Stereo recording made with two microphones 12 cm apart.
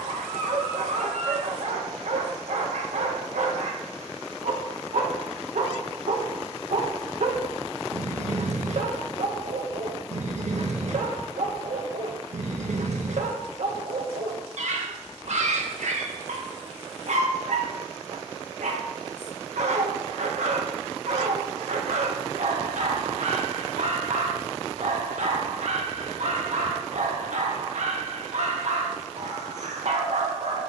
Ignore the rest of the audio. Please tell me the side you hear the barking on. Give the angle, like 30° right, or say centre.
70° right.